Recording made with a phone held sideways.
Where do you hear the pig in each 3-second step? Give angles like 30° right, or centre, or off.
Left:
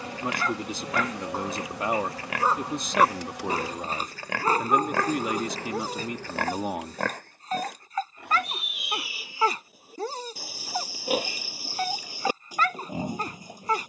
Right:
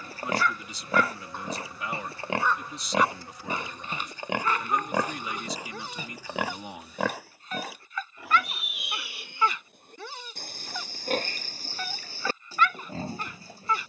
30° right, 20° right, centre, 10° left, 10° left.